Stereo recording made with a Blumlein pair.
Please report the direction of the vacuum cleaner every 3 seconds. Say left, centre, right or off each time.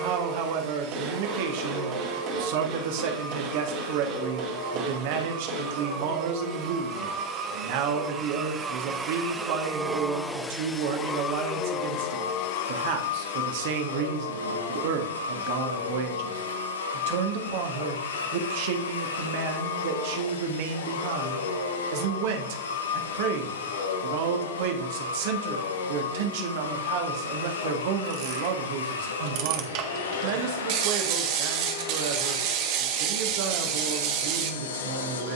right, right, right, centre, left, left, left, left, left, left, left, left.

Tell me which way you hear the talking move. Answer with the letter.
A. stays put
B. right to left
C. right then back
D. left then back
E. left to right
A.